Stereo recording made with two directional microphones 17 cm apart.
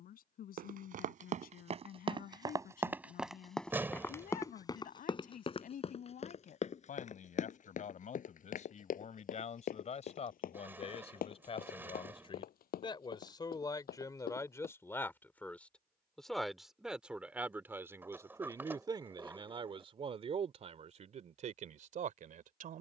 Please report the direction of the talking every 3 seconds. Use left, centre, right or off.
left, left, left, left, left, centre, right, right.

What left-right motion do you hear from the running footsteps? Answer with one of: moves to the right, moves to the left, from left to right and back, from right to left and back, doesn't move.
moves to the left.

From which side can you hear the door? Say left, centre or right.
centre.